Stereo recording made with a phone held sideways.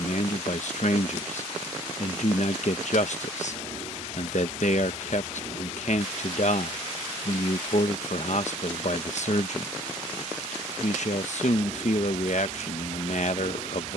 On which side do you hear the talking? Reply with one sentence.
In this clip you hear the talking on the left.